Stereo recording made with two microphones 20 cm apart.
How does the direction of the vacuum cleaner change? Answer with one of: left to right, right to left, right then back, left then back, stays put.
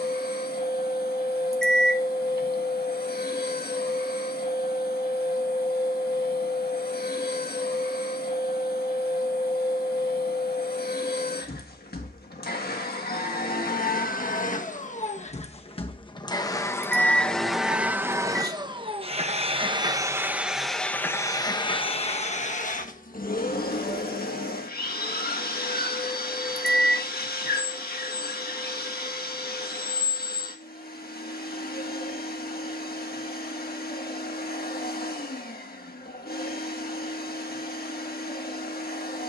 right then back.